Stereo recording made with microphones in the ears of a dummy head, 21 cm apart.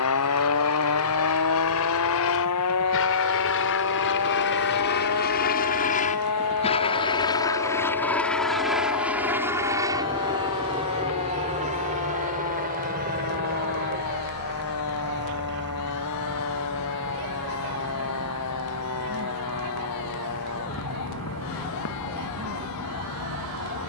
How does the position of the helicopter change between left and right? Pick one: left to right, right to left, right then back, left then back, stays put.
left to right.